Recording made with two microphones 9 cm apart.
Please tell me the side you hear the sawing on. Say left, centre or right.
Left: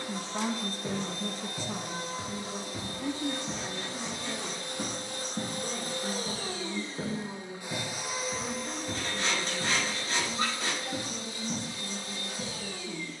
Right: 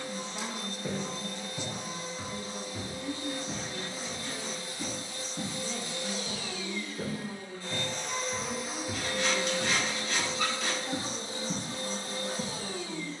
left.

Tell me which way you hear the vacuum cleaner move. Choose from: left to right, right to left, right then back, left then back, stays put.
left to right.